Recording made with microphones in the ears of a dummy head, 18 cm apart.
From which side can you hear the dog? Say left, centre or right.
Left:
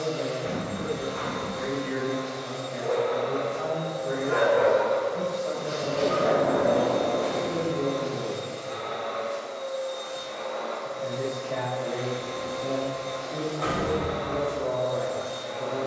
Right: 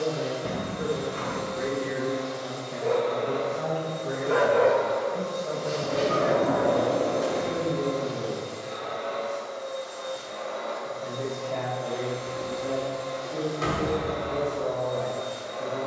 right.